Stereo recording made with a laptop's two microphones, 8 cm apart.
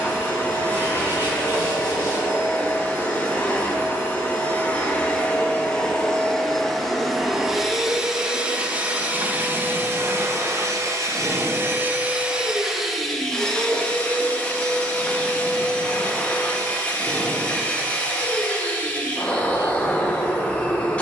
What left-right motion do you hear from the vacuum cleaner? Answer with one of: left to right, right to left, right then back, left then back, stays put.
right then back.